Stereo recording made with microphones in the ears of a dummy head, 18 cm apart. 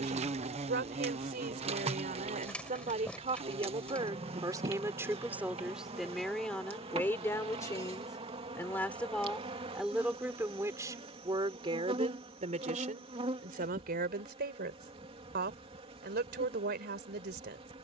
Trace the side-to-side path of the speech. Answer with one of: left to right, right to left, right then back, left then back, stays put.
left then back.